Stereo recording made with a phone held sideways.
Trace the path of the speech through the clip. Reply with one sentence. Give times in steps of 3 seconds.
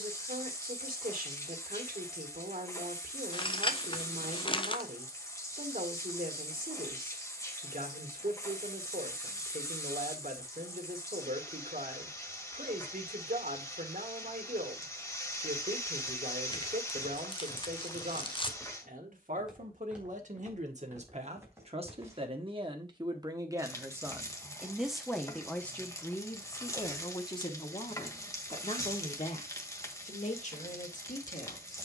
You can hear the speech on the right from 0 s, in the centre from 24 s and on the left from 27 s.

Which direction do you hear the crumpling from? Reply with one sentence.
In this clip you hear the crumpling on the left.